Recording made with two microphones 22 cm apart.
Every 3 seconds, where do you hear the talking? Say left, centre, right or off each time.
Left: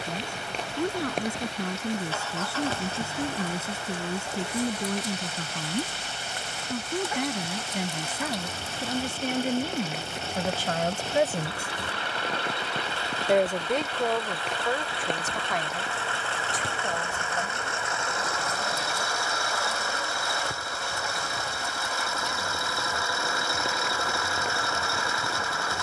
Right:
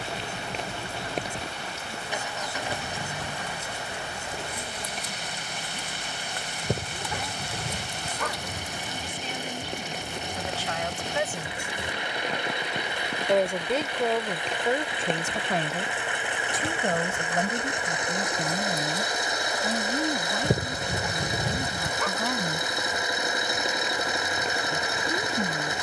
left, left, left, left, centre, right, right, right, right.